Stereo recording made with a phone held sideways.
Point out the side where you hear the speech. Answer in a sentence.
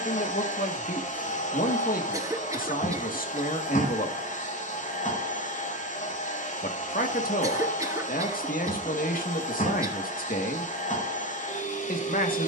In this clip you hear the speech on the left.